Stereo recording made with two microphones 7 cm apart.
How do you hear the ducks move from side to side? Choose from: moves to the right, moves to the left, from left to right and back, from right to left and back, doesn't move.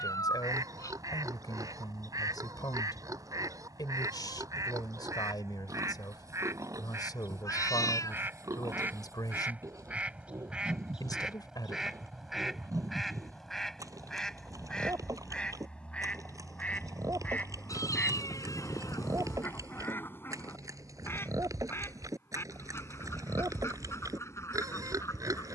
moves to the left.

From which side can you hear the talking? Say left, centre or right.
left.